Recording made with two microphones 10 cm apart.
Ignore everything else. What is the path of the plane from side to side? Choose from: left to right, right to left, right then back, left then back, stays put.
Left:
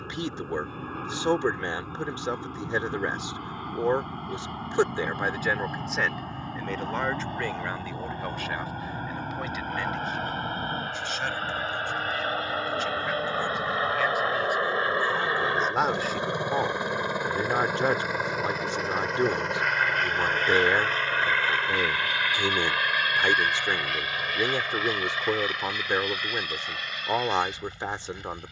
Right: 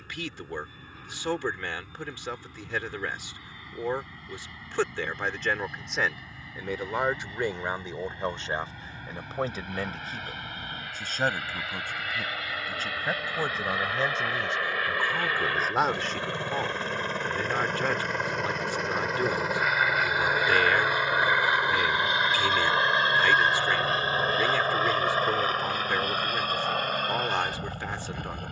left to right.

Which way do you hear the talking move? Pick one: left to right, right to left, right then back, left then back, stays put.
right then back.